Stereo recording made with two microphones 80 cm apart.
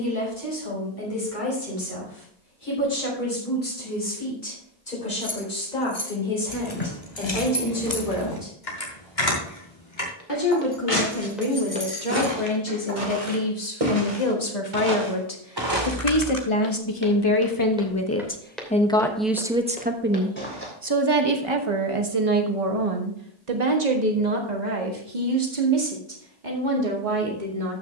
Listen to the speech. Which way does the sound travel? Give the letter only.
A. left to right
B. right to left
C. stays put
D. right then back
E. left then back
A.